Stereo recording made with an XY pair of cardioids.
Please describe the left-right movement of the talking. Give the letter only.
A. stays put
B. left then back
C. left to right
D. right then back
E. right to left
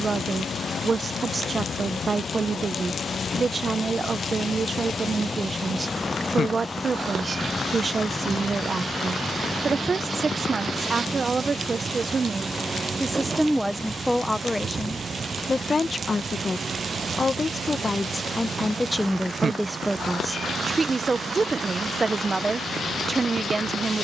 B.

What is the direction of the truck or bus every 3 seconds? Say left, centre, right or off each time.
left, left, centre, centre, right, right, right, right.